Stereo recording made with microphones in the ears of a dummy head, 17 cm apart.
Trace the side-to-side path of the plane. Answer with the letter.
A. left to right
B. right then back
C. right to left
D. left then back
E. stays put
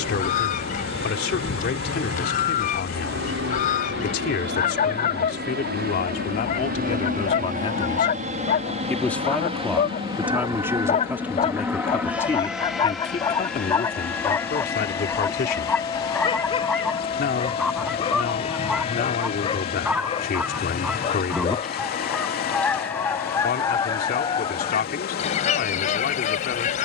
C.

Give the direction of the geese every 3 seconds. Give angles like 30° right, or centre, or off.
40° left, 40° left, 40° left, 40° left, 20° left, centre, 10° right, 10° left, 30° left.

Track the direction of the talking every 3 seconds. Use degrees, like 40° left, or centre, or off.
50° left, 50° left, 30° left, centre, 40° left, 50° left, 50° left, 50° left, 50° left.